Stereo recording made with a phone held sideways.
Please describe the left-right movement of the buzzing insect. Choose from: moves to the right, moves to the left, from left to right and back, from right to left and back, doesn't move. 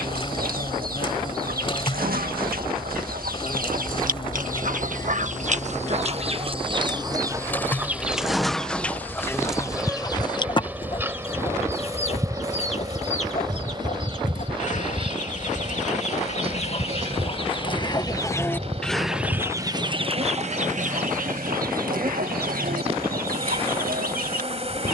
moves to the right.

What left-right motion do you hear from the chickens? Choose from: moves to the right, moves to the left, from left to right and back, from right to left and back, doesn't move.
from right to left and back.